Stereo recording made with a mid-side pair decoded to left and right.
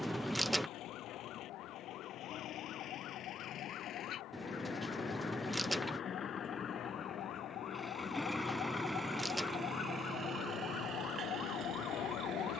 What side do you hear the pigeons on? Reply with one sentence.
In this clip you hear the pigeons in the centre.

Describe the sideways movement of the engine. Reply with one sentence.
In this clip you hear the engine travel towards the right.